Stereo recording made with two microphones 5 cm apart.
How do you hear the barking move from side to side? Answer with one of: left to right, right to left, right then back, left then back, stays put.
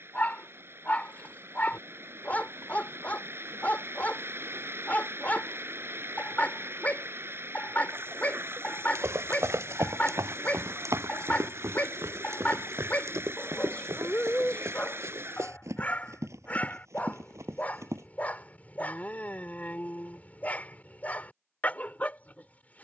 stays put.